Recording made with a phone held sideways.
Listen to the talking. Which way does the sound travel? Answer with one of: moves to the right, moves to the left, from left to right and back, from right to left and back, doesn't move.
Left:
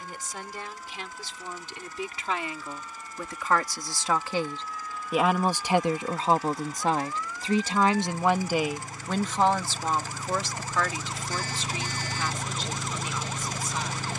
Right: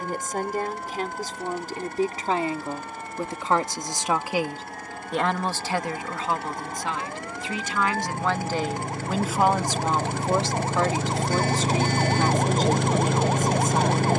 from right to left and back.